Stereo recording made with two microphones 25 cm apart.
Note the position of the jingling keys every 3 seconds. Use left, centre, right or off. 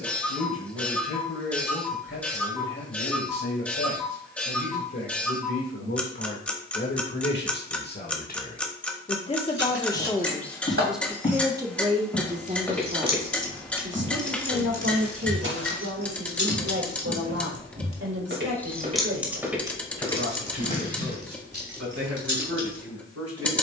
off, off, off, right, centre, left, centre, right.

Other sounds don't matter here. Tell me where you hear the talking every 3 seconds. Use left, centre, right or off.
left, left, left, centre, right, right, right, right.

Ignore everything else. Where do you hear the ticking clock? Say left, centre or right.
centre.